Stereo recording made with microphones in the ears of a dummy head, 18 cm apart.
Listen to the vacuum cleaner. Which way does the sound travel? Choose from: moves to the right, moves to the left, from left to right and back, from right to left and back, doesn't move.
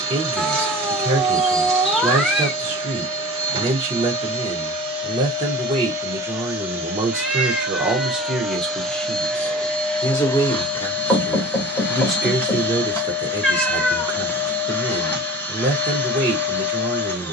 moves to the left.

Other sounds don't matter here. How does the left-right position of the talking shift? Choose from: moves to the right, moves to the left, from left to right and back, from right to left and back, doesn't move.
from right to left and back.